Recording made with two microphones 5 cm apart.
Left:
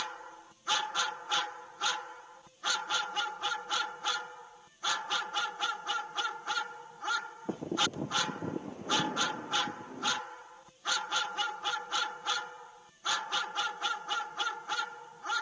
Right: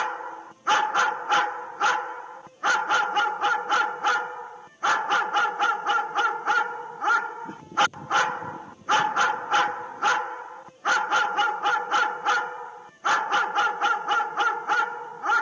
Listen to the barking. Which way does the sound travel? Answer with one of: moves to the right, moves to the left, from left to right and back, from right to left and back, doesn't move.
doesn't move.